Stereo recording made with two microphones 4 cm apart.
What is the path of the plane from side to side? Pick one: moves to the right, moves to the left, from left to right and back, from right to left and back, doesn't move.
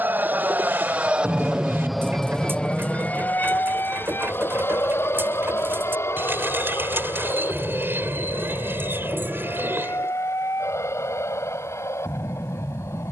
moves to the left.